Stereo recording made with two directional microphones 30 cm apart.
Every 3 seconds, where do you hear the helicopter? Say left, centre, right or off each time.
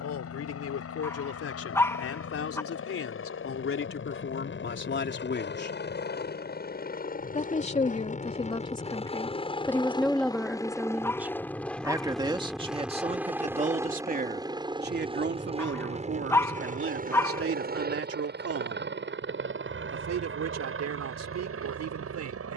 left, left, left, centre, centre, right, right, right.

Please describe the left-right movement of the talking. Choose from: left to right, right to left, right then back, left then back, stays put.
left to right.